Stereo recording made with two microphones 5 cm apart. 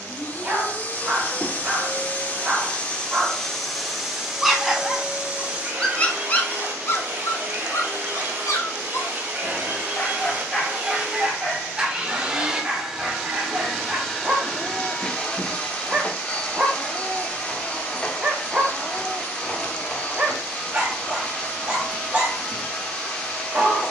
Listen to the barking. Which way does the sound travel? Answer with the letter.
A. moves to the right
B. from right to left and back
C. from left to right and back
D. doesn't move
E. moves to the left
B.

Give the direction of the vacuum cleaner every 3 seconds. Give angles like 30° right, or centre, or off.
30° left, 10° right, 40° right, 30° right, centre, 20° left, 20° left, 20° left.